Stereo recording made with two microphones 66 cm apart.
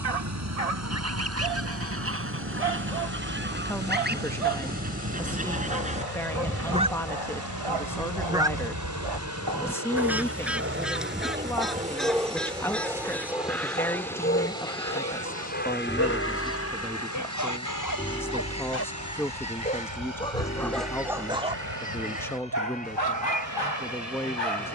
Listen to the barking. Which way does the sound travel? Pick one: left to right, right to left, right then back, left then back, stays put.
left then back.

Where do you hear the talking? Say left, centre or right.
centre.